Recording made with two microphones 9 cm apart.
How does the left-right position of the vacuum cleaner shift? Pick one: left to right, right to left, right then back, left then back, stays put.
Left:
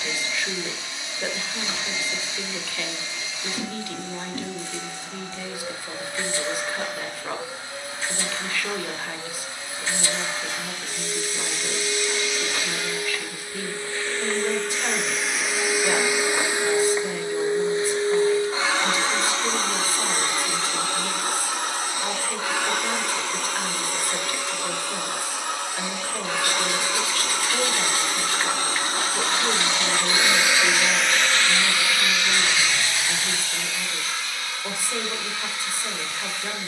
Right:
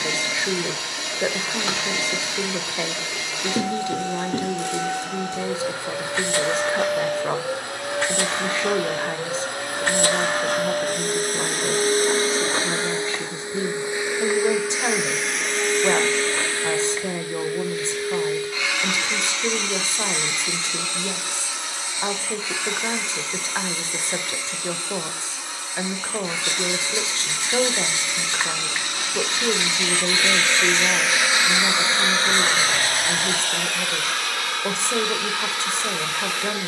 left then back.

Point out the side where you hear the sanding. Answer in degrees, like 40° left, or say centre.
20° right.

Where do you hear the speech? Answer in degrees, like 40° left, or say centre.
30° right.